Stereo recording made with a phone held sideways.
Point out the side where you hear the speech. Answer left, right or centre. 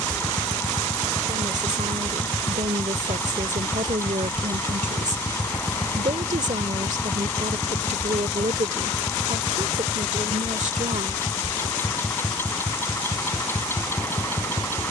right.